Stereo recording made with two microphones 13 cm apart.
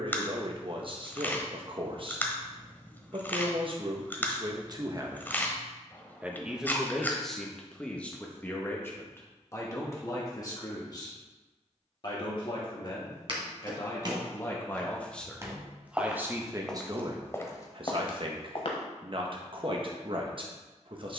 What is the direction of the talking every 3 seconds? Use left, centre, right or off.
right, right, centre, left, left, right, right.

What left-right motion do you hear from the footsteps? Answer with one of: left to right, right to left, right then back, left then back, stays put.
right to left.